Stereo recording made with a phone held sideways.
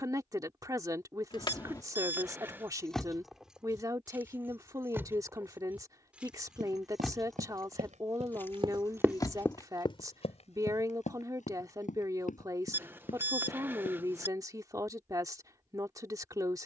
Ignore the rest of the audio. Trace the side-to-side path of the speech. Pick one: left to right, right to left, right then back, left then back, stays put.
stays put.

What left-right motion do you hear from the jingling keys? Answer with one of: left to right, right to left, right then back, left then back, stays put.
right then back.